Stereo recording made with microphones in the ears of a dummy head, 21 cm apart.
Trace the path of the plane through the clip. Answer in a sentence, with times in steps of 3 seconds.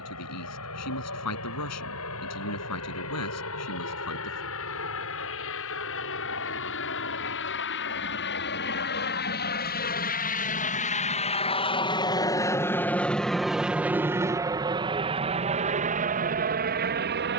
You can hear the plane on the left from 0 s, in the centre from 12 s and on the right from 15 s.